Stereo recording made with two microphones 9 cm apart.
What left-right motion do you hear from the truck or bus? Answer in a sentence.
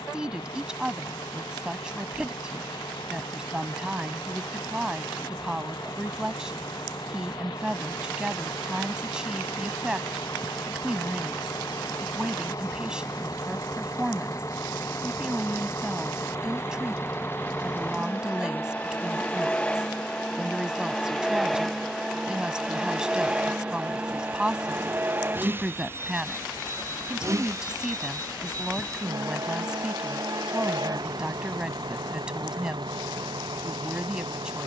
You can hear the truck or bus go from the left side to the right.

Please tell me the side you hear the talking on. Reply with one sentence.
In this clip you hear the talking in the centre.